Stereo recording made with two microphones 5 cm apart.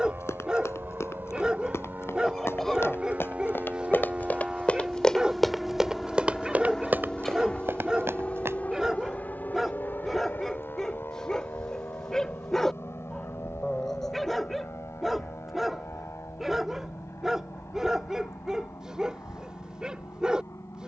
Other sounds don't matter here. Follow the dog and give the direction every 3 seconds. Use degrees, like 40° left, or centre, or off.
20° right, 20° right, 20° right, centre, centre, 10° right, 20° right.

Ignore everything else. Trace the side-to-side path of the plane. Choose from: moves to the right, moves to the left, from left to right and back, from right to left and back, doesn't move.
moves to the left.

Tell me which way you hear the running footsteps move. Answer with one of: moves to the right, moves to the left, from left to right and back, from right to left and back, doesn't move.
moves to the right.